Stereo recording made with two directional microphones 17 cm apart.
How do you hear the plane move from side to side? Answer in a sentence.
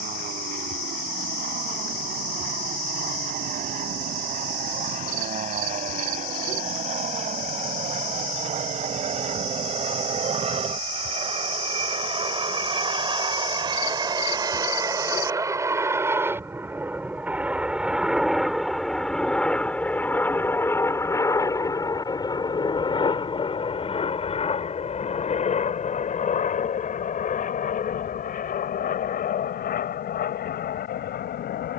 In this clip you hear the plane travel towards the left.